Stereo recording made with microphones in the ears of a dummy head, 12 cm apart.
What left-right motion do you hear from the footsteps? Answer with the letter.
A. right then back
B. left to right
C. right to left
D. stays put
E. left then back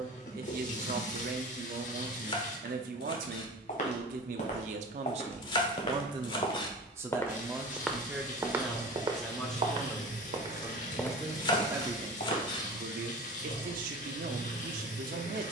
A.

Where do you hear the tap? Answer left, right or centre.
left.